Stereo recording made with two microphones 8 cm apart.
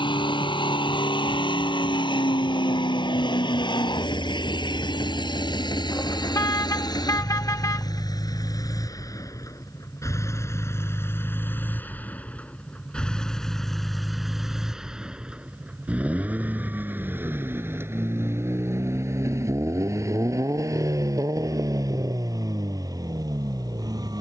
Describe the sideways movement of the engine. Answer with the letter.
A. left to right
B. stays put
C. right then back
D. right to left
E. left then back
A.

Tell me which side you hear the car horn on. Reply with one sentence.
In this clip you hear the car horn on the left.